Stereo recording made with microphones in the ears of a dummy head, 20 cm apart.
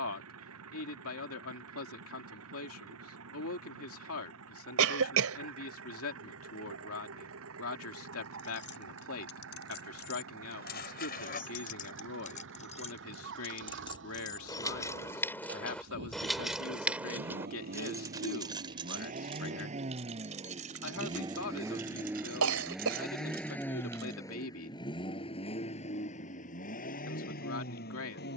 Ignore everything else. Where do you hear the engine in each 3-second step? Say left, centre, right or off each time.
right, right, right, right, right, right, right, centre, left, left.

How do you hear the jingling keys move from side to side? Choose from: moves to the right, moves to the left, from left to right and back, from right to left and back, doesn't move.
moves to the right.